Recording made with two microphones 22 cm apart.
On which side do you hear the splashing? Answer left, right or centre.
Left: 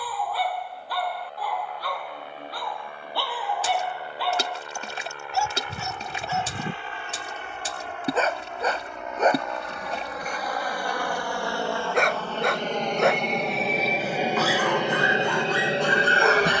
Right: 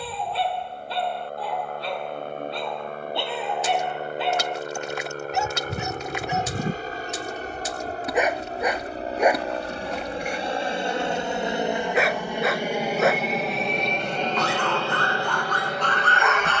left.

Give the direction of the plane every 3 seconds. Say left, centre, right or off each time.
right, right, right, right, centre, left.